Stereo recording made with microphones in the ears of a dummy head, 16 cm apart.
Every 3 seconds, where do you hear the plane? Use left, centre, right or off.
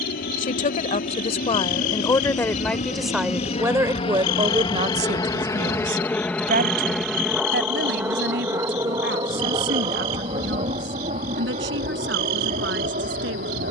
left, left, centre, right, right.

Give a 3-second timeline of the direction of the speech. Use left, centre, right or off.
left, right, right, right, right.